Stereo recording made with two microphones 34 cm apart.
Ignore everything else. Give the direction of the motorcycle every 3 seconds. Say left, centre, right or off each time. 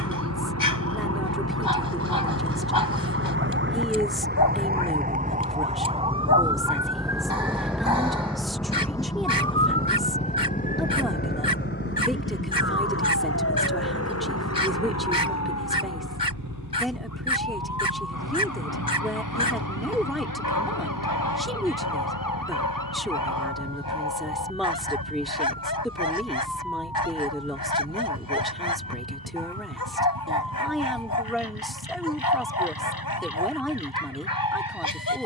left, left, centre, right, right, right, right, right, right, right, right, right.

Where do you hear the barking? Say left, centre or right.
left.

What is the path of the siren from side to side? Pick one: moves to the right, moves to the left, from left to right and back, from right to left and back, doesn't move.
moves to the left.